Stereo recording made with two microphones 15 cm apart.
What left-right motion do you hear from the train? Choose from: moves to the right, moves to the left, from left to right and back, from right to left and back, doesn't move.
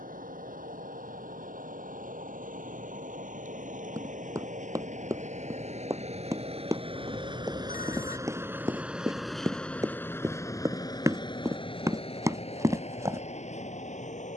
moves to the left.